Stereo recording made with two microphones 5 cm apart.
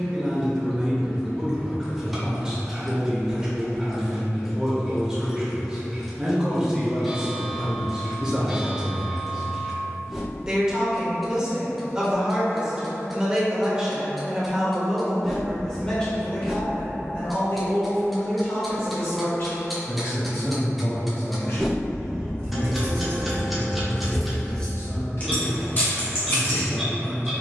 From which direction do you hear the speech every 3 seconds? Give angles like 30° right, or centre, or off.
10° right, 10° right, 10° right, 10° right, 10° right, 20° left, 60° left, 70° left, 70° left.